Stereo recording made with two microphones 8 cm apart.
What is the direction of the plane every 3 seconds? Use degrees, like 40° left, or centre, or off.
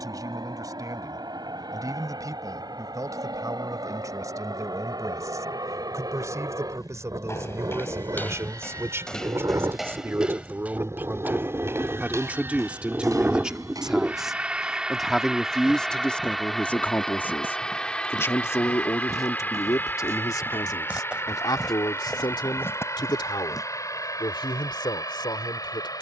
70° right, 60° right, 50° right, 40° right, 20° right, centre, 20° left, 40° left, 40° left.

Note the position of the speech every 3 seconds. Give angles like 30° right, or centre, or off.
50° right, 50° right, 40° right, 30° right, 10° right, 10° left, 40° left, 60° left, 70° left.